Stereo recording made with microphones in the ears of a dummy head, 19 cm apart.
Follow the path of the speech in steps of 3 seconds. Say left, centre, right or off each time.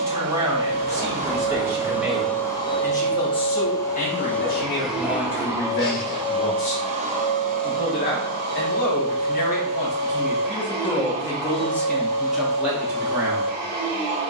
centre, left, left, left, centre.